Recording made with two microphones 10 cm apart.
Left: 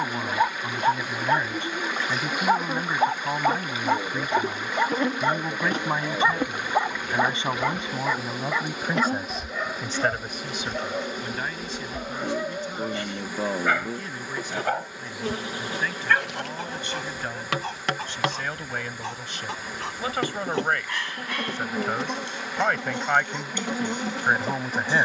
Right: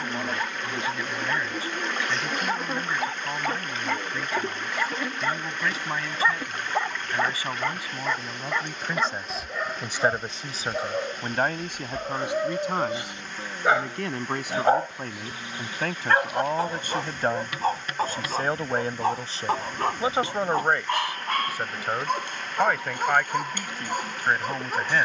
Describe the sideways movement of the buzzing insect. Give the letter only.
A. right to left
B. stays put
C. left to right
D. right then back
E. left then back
A.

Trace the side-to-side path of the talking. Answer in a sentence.
You can hear the talking move from left to right and back again.